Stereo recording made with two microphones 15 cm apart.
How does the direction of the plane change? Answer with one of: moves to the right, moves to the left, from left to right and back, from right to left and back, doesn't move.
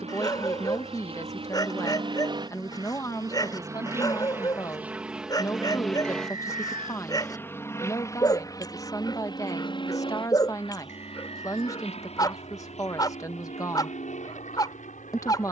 moves to the left.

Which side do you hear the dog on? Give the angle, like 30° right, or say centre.
30° left.